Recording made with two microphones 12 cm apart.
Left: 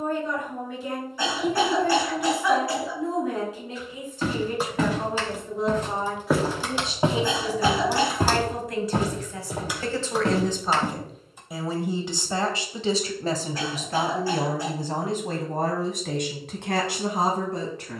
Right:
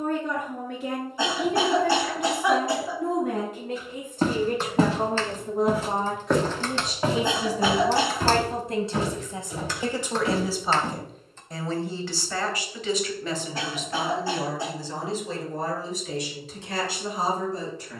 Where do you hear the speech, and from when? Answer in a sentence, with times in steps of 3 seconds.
You can hear the speech on the right from 0 s, in the centre from 9 s and on the left from 12 s.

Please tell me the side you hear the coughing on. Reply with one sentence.
In this clip you hear the coughing on the right.